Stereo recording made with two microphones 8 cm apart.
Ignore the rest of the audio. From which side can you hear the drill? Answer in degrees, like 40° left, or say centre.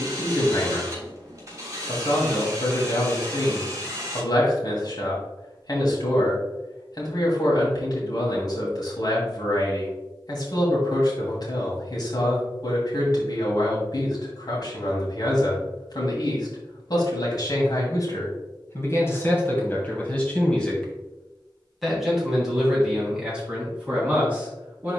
40° right.